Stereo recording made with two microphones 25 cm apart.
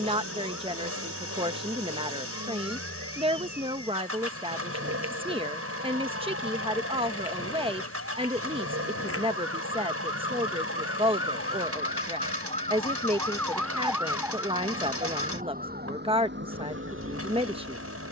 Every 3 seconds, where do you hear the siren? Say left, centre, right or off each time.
left, left, left, left, centre, right.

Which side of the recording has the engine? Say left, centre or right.
right.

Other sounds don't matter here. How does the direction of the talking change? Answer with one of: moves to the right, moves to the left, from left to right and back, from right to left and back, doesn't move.
doesn't move.